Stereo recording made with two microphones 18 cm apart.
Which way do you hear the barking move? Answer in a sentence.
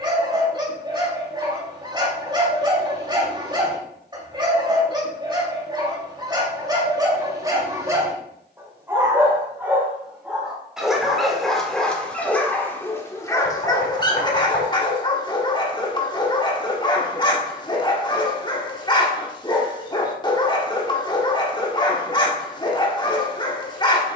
You can hear the barking move from right to left.